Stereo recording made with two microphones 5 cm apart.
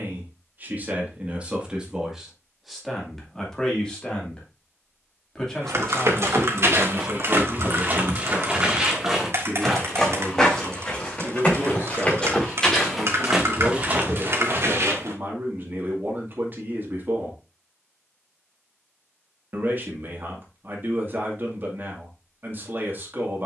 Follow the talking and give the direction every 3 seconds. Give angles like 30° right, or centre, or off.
20° right, 10° left, 10° right, 40° right, 40° right, 40° right, 40° right, 40° right.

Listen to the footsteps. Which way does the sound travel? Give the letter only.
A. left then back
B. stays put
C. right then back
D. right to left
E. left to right
A.